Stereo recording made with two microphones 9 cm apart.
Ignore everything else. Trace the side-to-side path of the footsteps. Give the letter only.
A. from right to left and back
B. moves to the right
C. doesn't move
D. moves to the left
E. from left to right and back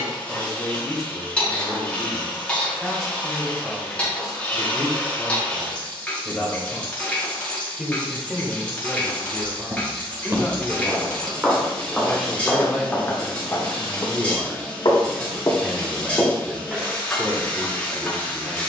A.